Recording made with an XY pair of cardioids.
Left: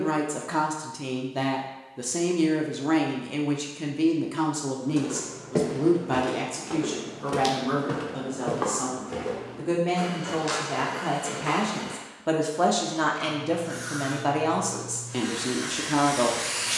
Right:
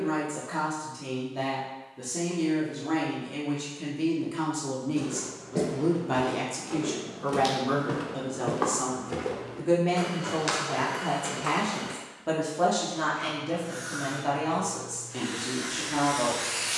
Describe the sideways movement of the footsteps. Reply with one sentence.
In this clip you hear the footsteps go from the left side to the right.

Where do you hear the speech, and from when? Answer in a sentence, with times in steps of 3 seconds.
In this clip you hear the speech on the left from 0 s, in the centre from 6 s and on the left from 12 s.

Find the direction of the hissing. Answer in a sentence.
You can hear the hissing on the left.